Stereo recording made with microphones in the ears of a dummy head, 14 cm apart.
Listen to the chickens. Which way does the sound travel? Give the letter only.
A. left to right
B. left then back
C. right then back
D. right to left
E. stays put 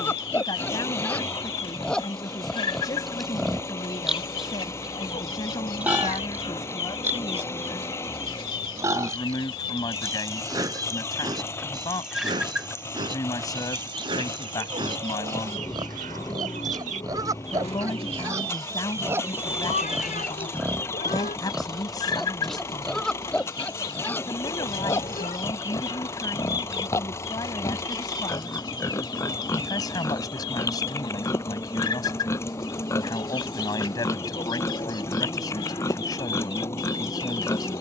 C.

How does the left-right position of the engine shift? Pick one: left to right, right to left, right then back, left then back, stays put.
stays put.